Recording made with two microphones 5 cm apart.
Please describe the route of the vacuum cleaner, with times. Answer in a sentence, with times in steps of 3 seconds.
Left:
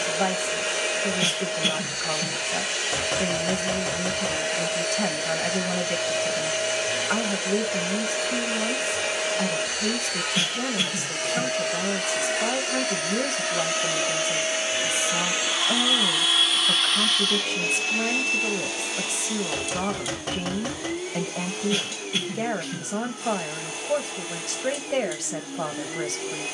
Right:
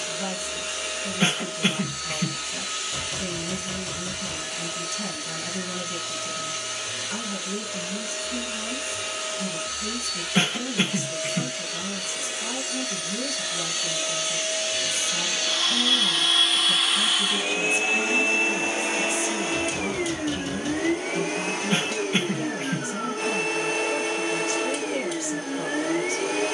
You can hear the vacuum cleaner on the left from 0 s, in the centre from 15 s and on the right from 18 s.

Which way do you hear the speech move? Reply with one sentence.
You can hear the speech stay put.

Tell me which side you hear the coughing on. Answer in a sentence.
In this clip you hear the coughing on the right.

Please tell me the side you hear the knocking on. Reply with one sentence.
You can hear the knocking on the left.